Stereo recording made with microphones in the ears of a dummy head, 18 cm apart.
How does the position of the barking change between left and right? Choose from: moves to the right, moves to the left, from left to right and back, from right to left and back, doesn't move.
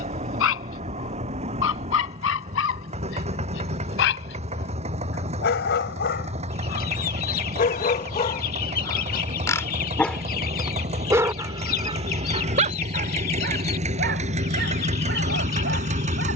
moves to the right.